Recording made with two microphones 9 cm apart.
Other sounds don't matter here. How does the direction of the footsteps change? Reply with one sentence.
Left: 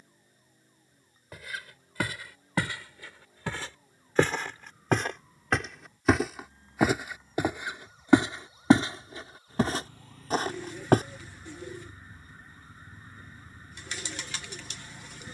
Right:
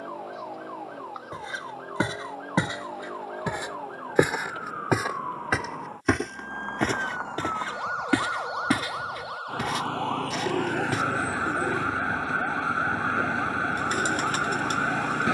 You can hear the footsteps go from the right side to the left.